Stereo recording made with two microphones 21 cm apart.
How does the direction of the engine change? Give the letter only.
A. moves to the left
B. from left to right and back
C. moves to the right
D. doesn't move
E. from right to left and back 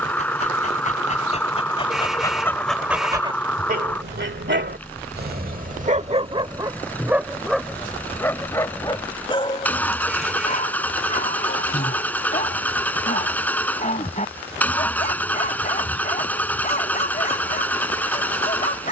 D.